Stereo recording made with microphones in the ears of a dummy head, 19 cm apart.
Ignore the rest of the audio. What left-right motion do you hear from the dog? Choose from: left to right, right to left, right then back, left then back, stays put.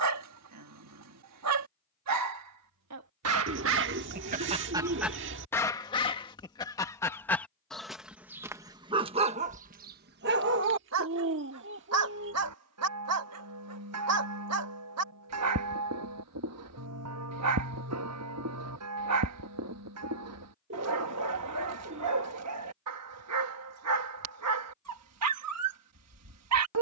left then back.